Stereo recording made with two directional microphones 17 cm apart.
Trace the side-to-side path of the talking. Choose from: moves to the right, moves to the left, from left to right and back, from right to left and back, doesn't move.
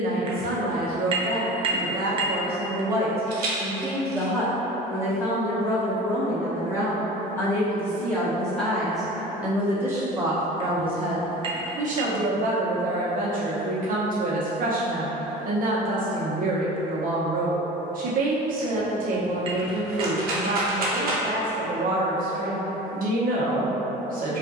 from right to left and back.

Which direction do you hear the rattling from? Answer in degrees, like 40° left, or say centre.
70° right.